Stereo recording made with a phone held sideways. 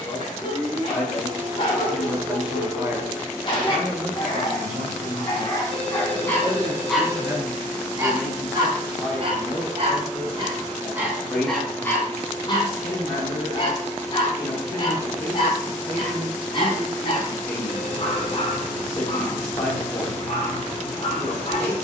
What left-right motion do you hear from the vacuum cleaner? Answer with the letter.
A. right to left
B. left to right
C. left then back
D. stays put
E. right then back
A.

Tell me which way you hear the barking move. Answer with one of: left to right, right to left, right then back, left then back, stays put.
right then back.